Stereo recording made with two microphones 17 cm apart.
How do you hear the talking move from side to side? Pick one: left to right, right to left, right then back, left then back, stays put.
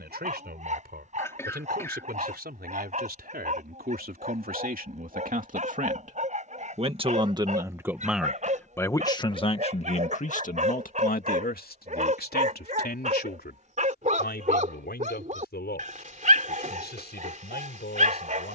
right to left.